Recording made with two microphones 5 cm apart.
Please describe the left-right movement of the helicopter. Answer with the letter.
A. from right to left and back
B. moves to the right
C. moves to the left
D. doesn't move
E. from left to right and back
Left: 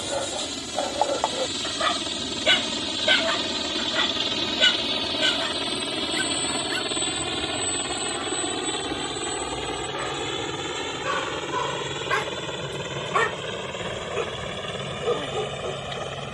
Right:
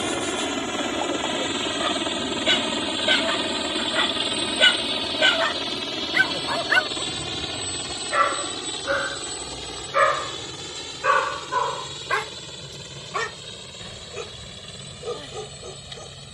C.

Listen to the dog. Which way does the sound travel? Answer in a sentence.
You can hear the dog go right and come back.